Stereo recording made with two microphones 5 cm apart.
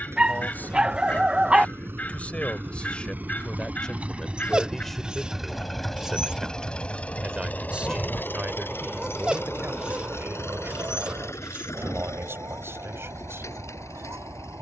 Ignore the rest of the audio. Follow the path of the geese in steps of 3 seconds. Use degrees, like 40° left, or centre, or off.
40° left, 40° left, 20° left, 40° right, 70° right.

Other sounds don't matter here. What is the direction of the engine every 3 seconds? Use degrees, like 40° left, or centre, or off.
50° right, 20° right, 30° left, 60° left, 80° left.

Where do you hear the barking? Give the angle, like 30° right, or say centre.
20° right.